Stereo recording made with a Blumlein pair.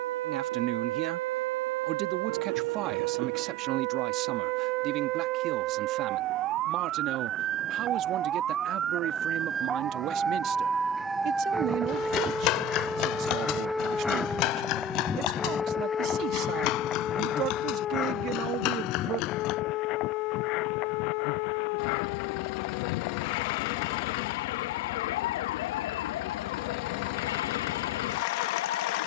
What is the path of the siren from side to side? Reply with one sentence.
In this clip you hear the siren move from right to left.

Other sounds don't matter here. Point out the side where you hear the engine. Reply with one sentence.
In this clip you hear the engine on the left.